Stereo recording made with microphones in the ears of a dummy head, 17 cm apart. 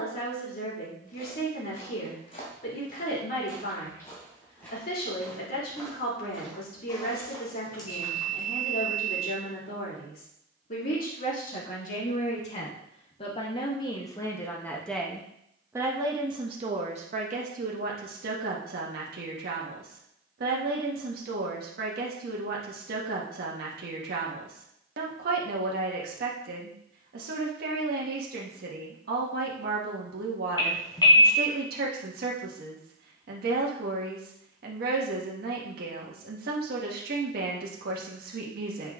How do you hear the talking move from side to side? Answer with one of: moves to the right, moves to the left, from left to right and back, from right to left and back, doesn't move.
moves to the right.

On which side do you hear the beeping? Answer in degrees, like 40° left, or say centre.
20° left.